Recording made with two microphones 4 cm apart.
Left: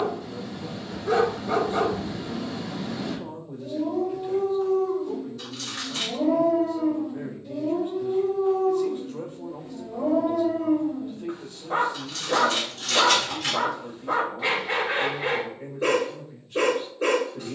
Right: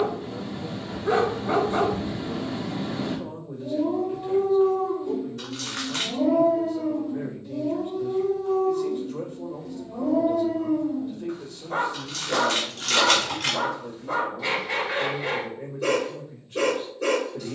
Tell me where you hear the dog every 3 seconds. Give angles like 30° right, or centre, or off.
30° right, 20° right, 10° left, 30° left, 30° left, 30° left.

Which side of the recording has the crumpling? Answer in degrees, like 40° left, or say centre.
70° right.